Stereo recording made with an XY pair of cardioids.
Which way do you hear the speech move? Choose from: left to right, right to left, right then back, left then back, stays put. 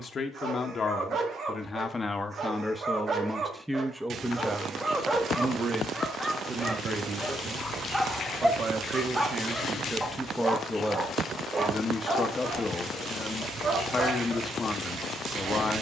right then back.